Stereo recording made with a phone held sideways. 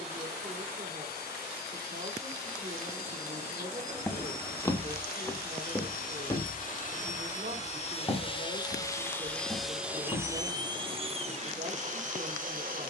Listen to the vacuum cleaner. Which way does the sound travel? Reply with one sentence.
In this clip you hear the vacuum cleaner move to the right.